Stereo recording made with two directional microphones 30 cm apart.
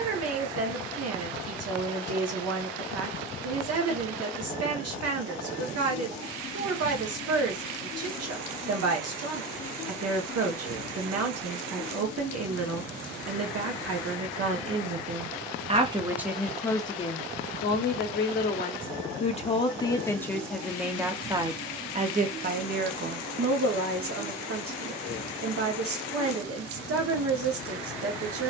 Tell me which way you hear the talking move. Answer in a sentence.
In this clip you hear the talking go left and come back.